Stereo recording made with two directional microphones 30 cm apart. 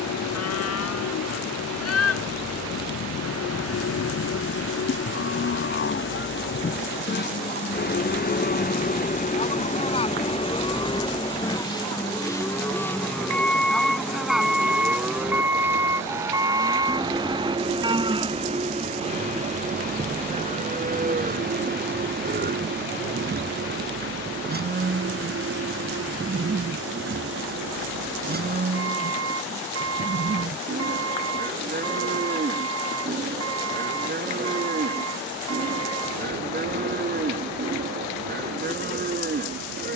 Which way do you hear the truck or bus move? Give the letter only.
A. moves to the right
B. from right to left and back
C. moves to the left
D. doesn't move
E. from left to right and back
A.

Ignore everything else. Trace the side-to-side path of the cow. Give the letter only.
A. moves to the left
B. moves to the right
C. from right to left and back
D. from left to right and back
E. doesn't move
B.